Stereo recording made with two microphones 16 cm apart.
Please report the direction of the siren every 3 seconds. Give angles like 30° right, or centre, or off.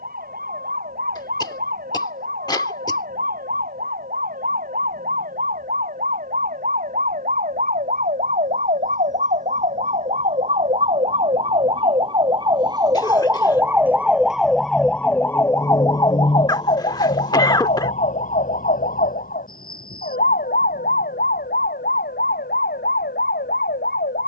70° right, 60° right, 60° right, 40° right, 10° right, 30° left, 60° left, 70° left.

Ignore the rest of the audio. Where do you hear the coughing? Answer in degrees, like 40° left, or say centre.
20° left.